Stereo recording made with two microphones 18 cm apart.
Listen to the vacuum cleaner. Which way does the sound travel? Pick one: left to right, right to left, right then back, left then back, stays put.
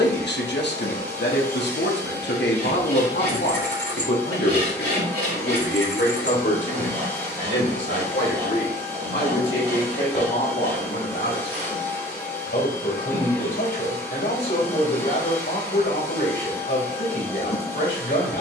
stays put.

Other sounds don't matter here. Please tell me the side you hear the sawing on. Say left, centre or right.
right.